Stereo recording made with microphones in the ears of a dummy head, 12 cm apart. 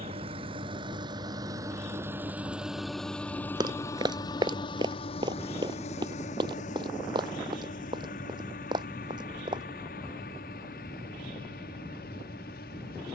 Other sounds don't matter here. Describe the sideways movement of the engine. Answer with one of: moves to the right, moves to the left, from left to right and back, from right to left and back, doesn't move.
moves to the left.